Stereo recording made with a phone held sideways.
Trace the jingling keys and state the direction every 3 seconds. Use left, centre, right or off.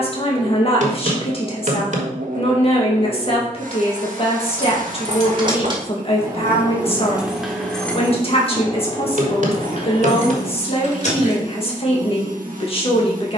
off, right, centre, left, off.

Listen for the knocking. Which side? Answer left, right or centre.
right.